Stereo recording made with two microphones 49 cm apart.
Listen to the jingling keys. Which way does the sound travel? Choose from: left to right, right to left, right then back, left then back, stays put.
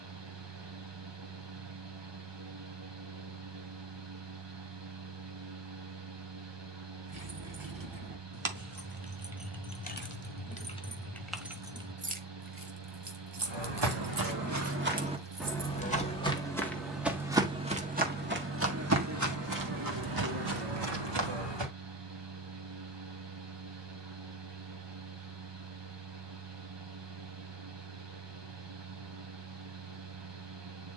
left then back.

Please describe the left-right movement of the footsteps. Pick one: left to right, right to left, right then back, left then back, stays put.
left then back.